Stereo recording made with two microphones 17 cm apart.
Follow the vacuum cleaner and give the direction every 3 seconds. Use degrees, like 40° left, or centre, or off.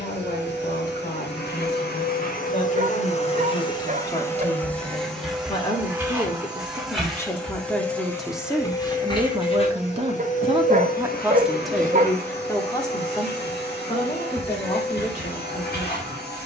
70° left, 10° left, 10° left, 50° left, 70° left, 70° left.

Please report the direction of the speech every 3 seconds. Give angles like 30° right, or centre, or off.
40° left, 30° left, 10° left, 20° right, 30° left, 40° left.